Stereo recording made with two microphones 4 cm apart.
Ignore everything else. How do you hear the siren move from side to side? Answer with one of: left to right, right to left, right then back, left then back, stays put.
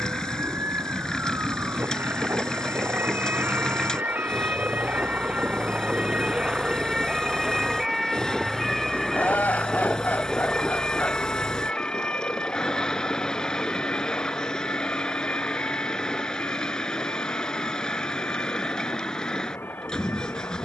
right to left.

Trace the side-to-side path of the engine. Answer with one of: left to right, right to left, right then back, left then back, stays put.
stays put.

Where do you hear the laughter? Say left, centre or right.
left.